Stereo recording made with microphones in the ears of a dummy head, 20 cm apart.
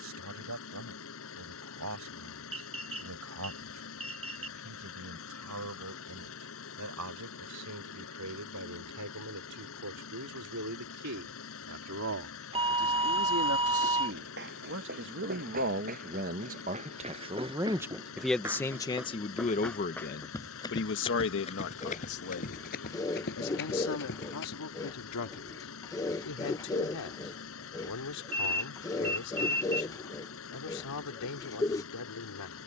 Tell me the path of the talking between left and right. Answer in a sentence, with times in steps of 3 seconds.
You can hear the talking on the right from 0 s and on the left from 18 s.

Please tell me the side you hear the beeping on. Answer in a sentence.
In this clip you hear the beeping on the right.